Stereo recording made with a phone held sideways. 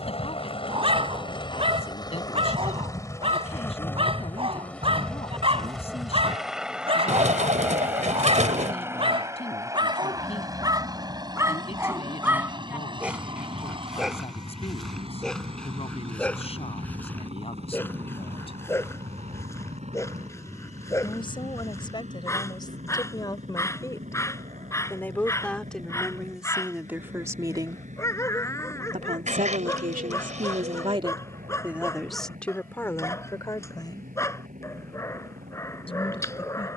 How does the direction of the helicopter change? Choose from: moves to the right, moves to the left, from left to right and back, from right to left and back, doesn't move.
moves to the right.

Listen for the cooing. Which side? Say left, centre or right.
right.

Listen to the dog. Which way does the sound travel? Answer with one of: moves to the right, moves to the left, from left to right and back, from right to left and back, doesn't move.
moves to the left.